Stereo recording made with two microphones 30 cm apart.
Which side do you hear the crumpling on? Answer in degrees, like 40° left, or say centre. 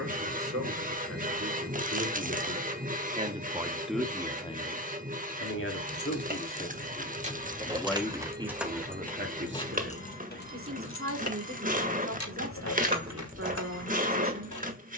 30° right.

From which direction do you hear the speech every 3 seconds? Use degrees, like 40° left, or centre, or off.
50° right, 10° left, 10° left, 40° right, 50° right.